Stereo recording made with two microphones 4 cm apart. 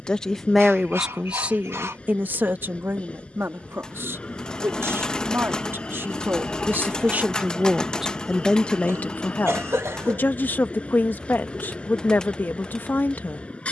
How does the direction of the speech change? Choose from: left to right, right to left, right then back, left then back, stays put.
right then back.